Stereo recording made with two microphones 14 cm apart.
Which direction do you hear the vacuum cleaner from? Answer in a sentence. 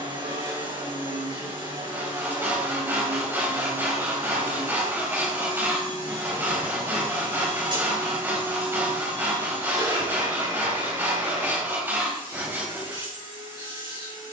In this clip you hear the vacuum cleaner on the right.